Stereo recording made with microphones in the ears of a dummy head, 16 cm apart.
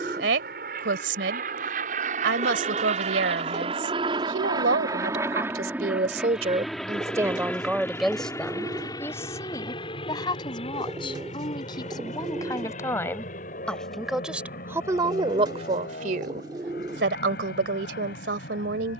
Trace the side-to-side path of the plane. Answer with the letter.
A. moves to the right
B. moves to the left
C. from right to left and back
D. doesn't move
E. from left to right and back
B.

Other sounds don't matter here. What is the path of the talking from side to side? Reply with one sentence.
In this clip you hear the talking move from right to left and back again.